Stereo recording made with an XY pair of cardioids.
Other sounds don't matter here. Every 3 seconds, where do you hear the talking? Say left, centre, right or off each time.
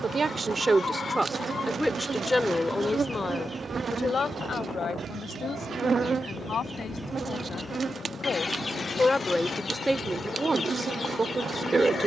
centre, left, left, centre.